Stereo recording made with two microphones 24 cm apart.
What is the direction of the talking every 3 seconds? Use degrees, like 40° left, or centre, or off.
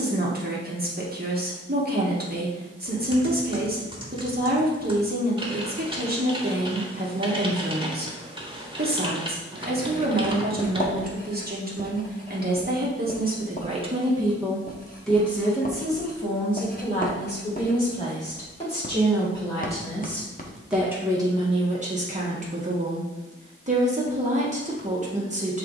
40° right, 40° right, 40° right, 40° right, 30° right, 20° left, 10° left, 30° right, 30° right.